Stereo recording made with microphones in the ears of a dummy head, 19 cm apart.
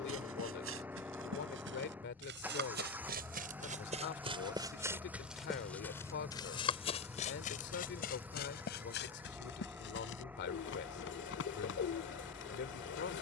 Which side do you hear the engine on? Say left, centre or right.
centre.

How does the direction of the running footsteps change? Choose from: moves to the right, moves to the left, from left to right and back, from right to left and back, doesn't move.
moves to the left.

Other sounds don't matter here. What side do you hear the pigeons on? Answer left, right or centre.
left.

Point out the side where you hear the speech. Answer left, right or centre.
left.